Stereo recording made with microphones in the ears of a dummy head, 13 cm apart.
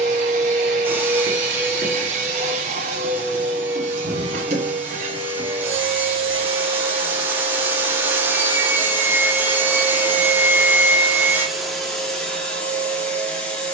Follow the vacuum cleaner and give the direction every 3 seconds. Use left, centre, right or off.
right, right, right, centre, centre.